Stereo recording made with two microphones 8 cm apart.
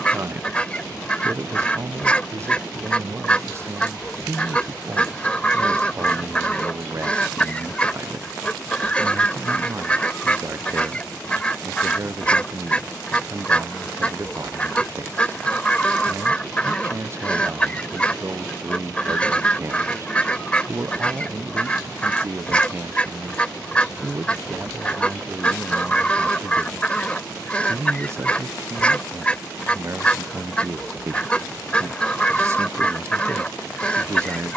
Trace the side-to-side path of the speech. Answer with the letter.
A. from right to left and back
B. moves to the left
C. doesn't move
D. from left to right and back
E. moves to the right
C.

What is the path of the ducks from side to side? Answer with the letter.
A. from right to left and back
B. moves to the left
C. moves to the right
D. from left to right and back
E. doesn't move
E.